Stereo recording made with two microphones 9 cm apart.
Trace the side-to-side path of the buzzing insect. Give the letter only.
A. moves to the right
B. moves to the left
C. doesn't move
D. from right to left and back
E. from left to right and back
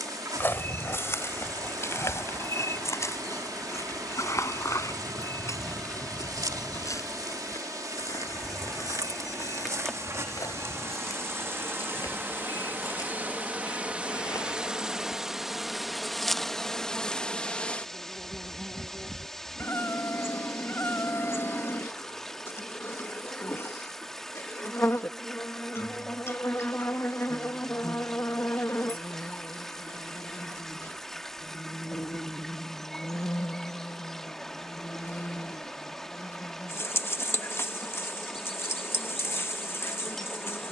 B.